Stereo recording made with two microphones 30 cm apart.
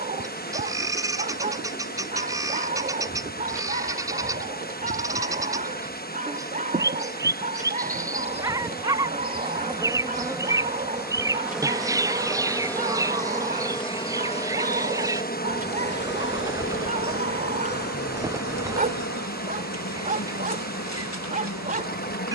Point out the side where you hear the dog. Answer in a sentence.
You can hear the dog on the right.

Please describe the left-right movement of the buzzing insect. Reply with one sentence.
You can hear the buzzing insect go from the right side to the left.